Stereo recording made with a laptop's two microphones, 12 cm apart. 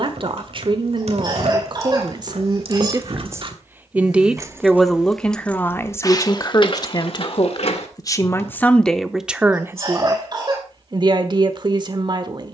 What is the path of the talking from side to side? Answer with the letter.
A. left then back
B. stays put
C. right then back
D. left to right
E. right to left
A.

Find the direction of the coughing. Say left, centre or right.
right.